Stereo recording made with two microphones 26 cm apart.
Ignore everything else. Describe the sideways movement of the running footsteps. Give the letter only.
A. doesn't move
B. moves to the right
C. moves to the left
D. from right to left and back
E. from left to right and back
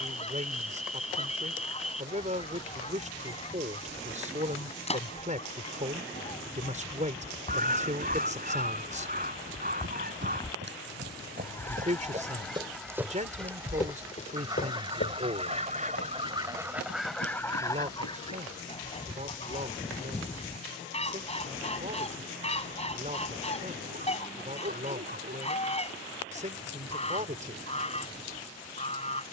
C.